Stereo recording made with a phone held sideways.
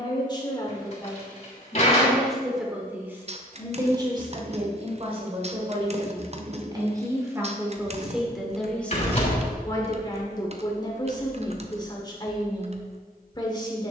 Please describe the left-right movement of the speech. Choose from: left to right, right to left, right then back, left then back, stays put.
right then back.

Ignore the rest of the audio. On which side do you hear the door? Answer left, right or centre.
left.